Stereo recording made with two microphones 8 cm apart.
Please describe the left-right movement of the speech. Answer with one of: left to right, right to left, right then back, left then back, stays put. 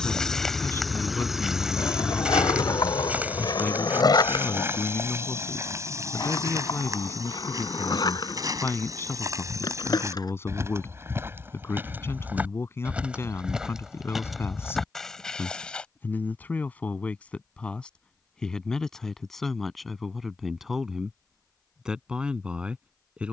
left to right.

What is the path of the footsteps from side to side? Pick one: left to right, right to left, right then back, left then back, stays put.
right then back.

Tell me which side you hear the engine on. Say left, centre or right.
centre.